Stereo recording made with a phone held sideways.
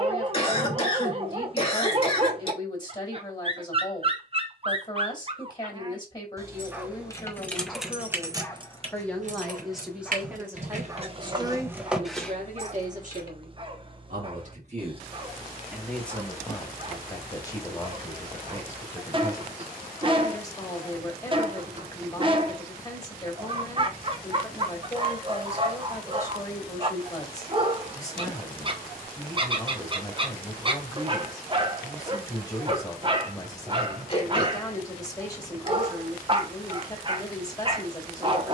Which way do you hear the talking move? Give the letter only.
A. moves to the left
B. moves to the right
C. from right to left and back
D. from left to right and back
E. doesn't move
D.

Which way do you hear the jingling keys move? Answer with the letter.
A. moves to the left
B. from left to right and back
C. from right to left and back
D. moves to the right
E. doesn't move
B.